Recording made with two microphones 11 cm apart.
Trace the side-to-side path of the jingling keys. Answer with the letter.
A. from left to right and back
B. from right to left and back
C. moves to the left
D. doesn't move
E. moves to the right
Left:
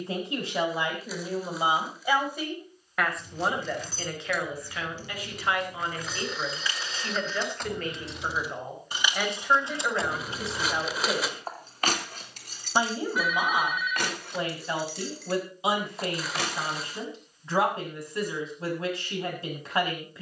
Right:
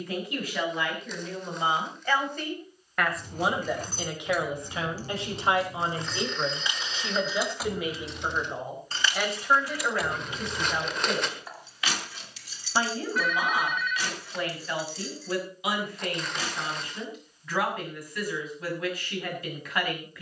C.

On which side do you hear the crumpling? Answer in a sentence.
You can hear the crumpling in the centre.